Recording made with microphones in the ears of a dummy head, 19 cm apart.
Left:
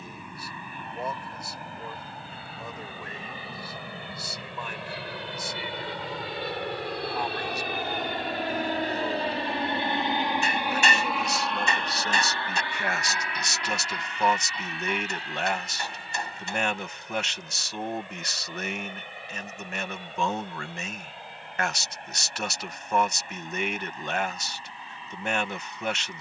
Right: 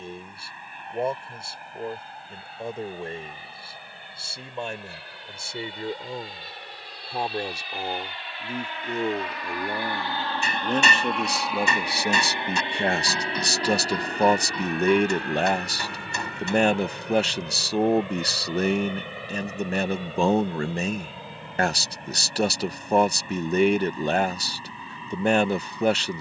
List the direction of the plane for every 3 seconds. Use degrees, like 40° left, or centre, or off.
70° left, 70° left, 50° left, 10° left, 30° right, 50° right, 60° right, 70° right, 70° right.